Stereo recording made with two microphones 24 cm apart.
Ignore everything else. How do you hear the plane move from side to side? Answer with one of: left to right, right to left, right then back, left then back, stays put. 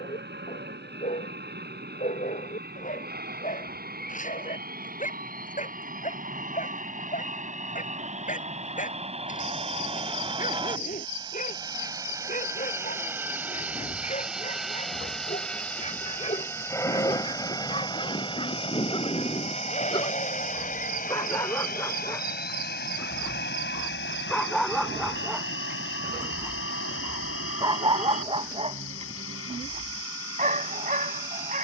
right to left.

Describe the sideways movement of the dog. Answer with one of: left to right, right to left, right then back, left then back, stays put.
left to right.